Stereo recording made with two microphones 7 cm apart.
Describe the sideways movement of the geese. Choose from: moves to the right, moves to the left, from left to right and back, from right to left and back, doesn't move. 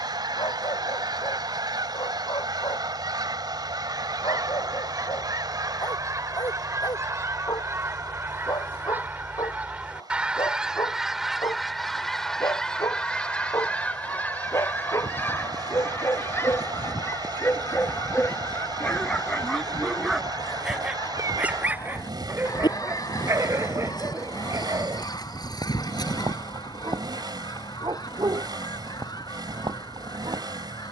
moves to the left.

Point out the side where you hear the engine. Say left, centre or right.
right.